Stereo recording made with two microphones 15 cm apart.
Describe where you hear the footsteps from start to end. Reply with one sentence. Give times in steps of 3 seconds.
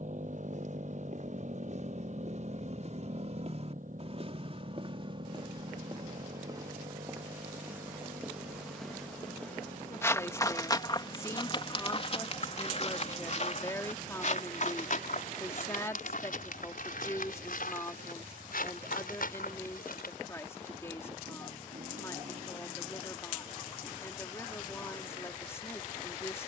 In this clip you hear the footsteps on the right from 0 s, in the centre from 6 s, on the left from 9 s and not at all from 21 s.